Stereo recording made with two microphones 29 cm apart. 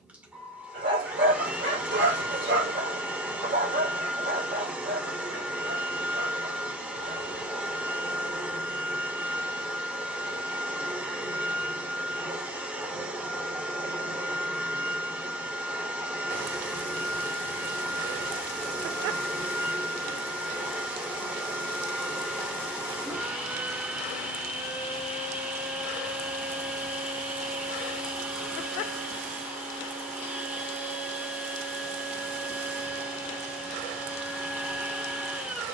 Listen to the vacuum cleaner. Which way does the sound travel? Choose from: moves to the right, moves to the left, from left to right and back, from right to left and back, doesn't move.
doesn't move.